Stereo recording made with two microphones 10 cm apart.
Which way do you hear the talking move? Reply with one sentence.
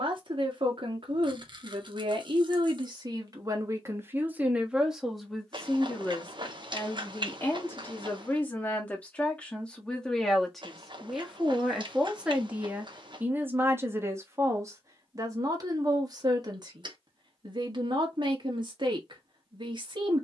You can hear the talking go left and come back.